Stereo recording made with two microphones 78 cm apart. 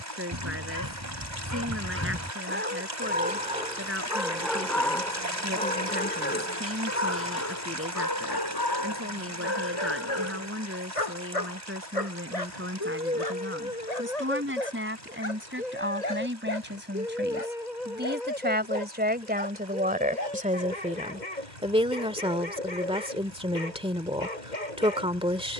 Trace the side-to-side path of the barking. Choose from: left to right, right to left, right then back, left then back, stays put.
right to left.